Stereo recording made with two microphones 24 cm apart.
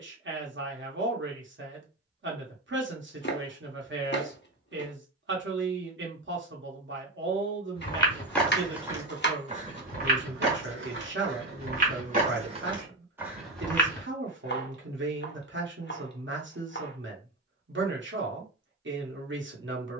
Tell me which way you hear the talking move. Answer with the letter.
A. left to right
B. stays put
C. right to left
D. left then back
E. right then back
B.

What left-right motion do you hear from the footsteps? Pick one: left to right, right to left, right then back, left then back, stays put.
right then back.